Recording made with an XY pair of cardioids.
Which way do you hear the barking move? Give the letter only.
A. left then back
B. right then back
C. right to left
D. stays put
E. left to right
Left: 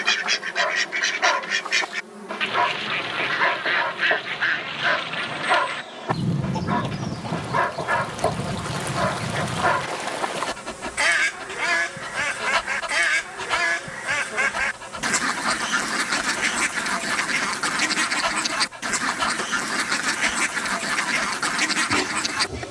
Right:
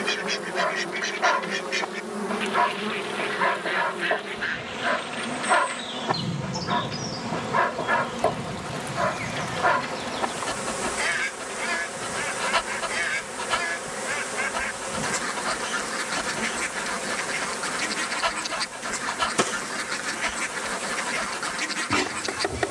D.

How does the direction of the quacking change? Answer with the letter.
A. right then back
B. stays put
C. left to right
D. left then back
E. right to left
B.